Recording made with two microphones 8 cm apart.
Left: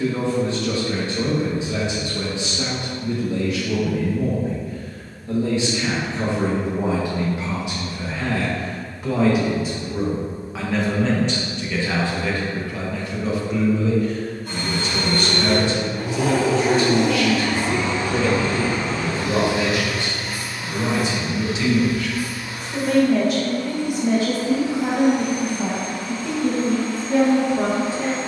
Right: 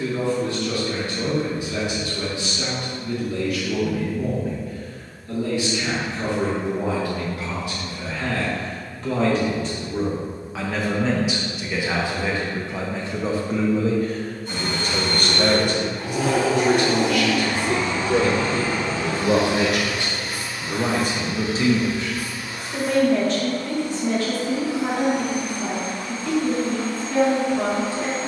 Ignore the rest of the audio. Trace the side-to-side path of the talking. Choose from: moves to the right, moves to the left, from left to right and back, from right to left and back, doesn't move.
from left to right and back.